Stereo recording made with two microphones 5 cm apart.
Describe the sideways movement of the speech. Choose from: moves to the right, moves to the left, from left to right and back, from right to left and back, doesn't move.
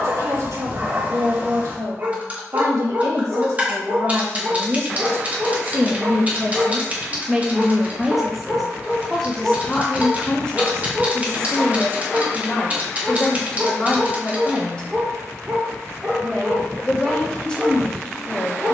moves to the left.